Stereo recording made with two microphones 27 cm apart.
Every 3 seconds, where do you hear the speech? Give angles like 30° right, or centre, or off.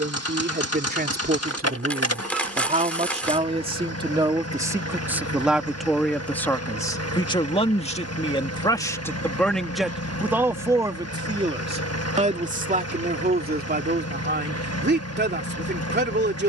40° right, 10° right, 10° left, 10° right, 40° right, 40° right.